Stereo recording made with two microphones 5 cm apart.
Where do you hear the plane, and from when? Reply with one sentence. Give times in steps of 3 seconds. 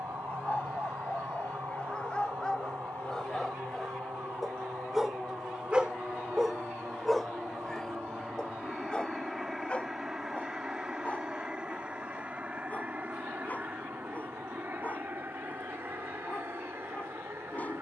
You can hear the plane on the left from 0 s, in the centre from 6 s and on the right from 12 s.